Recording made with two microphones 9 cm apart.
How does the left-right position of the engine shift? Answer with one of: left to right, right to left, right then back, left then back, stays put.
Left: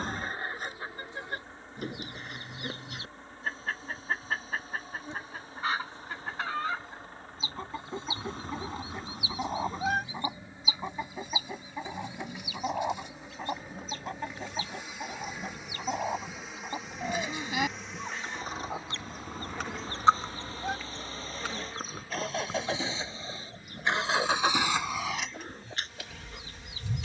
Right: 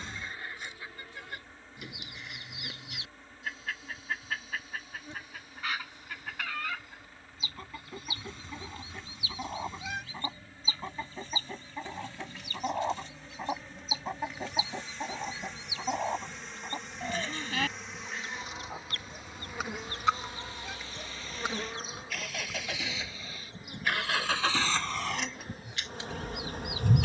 left to right.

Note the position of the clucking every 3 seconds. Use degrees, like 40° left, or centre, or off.
50° left, 40° left, 30° left, 20° left, centre, centre, 30° left, 40° left, 50° left.